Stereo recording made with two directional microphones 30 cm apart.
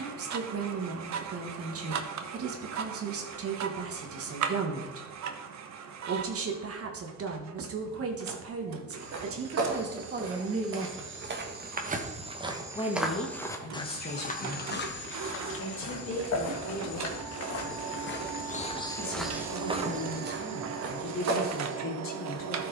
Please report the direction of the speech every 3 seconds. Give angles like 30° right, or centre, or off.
50° right, 50° right, 50° right, 30° right, 30° left, 40° left, 40° left, 40° left.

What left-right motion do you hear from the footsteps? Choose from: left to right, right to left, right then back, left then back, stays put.
left then back.